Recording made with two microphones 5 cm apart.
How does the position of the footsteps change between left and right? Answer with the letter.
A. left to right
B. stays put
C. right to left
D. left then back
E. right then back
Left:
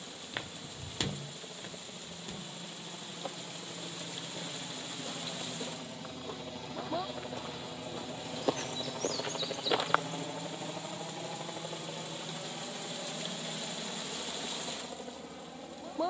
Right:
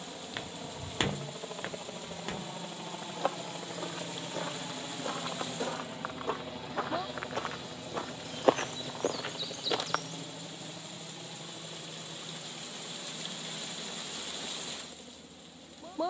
E.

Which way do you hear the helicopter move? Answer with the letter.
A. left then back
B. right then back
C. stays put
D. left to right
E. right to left
E.